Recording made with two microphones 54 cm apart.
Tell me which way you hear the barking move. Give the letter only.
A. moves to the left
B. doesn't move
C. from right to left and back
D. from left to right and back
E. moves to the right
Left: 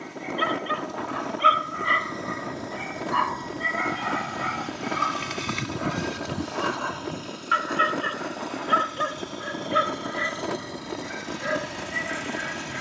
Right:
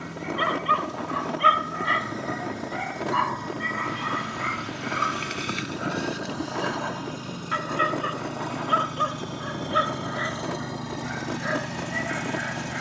A.